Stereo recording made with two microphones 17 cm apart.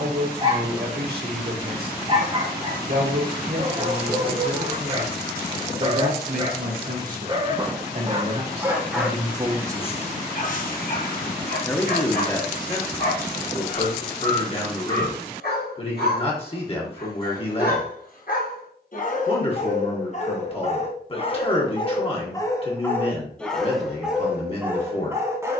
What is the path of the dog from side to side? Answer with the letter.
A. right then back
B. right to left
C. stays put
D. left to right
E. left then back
E.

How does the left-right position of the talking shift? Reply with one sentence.
In this clip you hear the talking move to the left.